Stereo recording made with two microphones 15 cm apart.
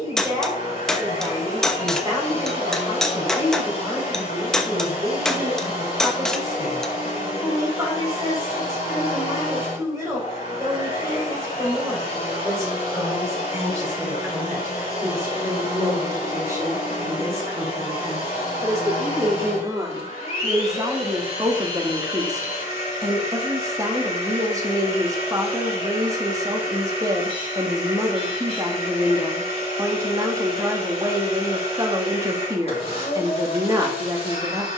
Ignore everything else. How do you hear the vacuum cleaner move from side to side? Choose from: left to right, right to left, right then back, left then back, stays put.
stays put.